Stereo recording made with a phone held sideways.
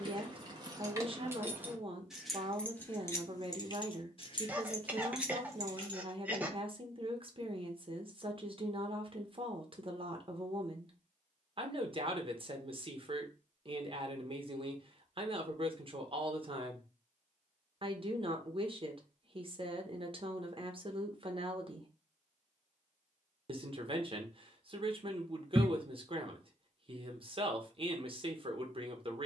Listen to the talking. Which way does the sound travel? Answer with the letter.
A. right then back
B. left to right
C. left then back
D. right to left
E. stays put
E.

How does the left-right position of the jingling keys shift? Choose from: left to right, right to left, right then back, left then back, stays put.
left then back.